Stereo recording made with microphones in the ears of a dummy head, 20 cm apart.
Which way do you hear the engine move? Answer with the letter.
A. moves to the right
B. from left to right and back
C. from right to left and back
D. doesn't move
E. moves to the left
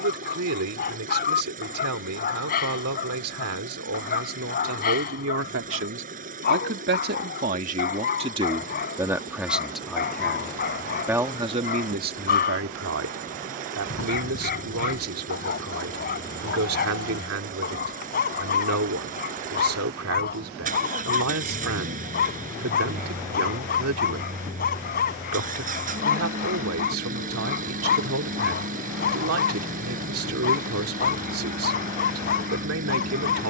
D.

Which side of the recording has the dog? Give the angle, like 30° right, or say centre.
40° left.